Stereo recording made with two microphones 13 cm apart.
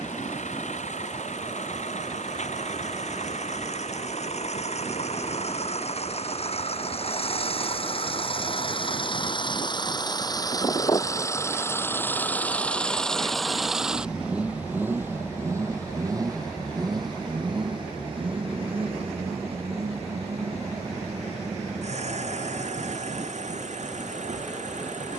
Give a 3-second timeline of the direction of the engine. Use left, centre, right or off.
left, left, left, left, centre, right, right, right, right.